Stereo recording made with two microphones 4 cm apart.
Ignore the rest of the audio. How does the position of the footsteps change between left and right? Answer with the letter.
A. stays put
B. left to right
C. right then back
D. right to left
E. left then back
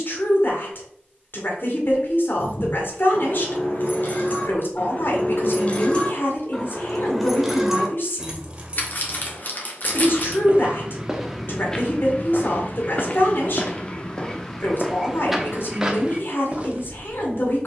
E.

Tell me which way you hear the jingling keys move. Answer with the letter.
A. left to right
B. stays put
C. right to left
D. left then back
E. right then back
A.